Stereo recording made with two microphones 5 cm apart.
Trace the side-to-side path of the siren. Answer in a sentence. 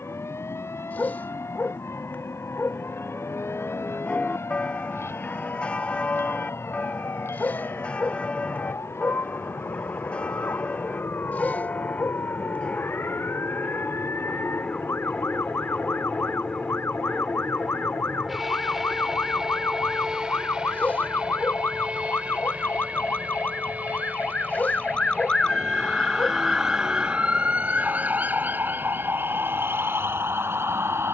You can hear the siren travel towards the right.